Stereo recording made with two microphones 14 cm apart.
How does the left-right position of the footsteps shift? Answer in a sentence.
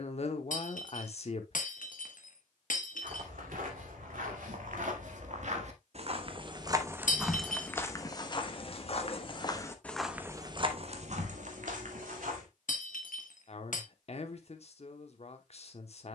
In this clip you hear the footsteps move from right to left and back again.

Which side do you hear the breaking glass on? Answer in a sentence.
You can hear the breaking glass on the left.